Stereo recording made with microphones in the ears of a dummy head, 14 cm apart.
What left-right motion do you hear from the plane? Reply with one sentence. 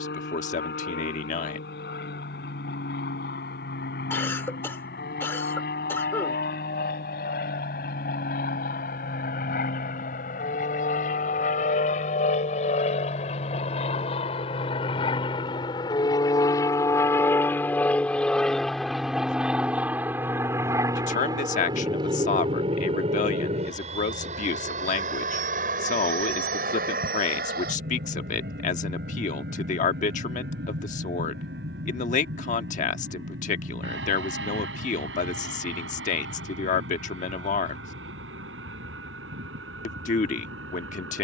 You can hear the plane travel towards the right.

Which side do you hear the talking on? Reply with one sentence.
You can hear the talking on the left.